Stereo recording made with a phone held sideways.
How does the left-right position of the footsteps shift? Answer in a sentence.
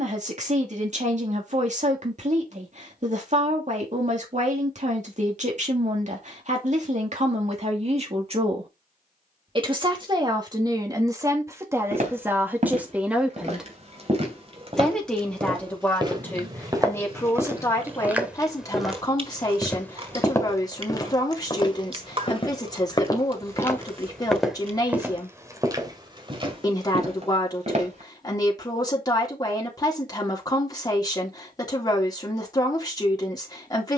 You can hear the footsteps move from right to left and back again.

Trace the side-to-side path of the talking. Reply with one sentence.
You can hear the talking travel towards the left.